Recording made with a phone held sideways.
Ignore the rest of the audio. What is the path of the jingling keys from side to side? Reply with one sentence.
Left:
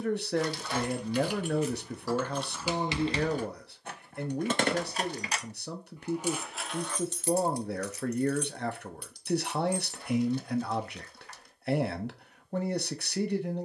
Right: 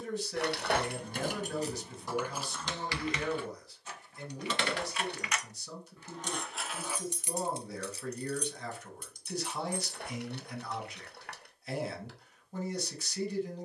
In this clip you hear the jingling keys go left and come back.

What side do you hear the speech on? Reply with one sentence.
In this clip you hear the speech on the left.